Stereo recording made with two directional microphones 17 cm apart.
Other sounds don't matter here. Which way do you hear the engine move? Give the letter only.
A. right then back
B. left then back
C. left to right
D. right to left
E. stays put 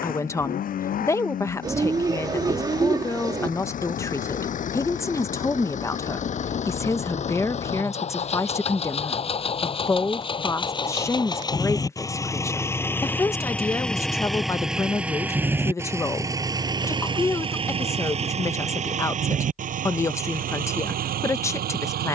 C.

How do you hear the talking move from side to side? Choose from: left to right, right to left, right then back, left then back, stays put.
stays put.